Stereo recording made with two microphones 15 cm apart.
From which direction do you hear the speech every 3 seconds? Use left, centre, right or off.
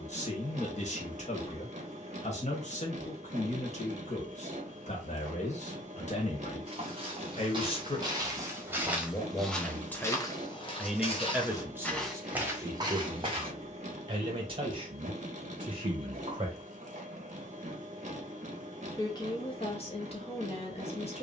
left, left, left, centre, right, right, left.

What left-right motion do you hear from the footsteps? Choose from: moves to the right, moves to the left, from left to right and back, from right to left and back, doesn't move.
from right to left and back.